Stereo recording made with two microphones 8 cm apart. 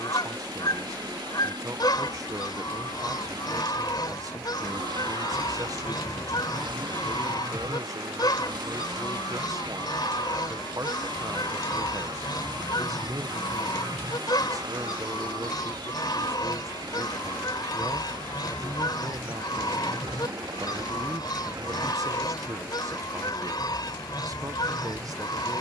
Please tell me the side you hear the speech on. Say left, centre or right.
right.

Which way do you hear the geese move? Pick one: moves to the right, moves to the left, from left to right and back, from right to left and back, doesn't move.
doesn't move.